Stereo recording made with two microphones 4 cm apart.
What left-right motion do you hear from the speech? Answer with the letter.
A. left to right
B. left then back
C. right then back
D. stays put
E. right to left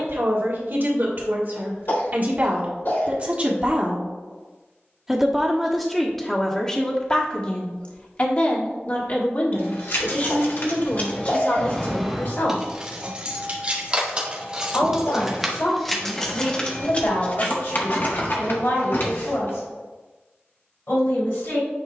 E.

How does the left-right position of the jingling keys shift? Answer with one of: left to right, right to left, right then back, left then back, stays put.
right then back.